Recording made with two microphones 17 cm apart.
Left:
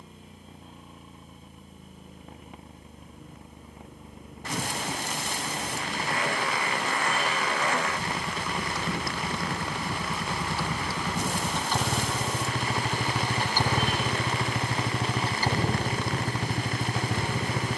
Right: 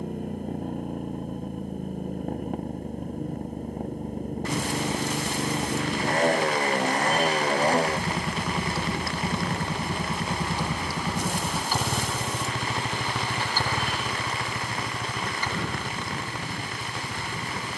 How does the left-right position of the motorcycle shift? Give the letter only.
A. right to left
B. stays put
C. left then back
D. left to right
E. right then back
A.